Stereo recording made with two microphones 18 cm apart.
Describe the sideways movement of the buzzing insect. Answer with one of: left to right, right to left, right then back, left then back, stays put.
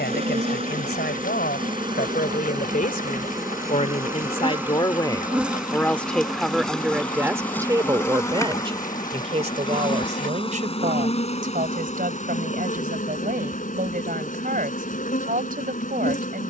right to left.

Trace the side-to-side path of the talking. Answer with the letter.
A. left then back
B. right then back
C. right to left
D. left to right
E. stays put
D.